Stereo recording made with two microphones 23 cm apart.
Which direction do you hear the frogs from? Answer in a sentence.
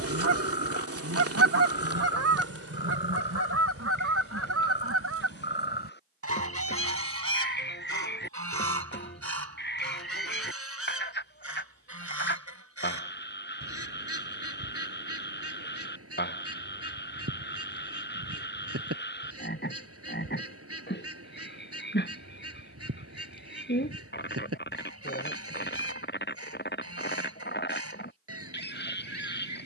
In this clip you hear the frogs on the left.